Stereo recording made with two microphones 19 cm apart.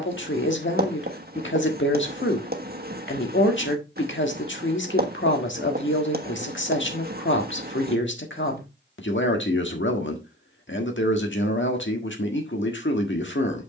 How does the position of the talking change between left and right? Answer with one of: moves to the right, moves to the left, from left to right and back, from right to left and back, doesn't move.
doesn't move.